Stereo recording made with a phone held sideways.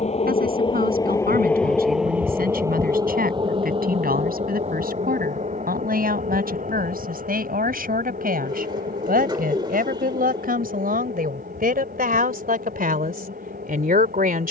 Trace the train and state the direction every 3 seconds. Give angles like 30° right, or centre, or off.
10° left, 40° right, 60° right, 60° right, 70° right.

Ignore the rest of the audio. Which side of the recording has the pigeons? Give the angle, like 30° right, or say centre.
30° right.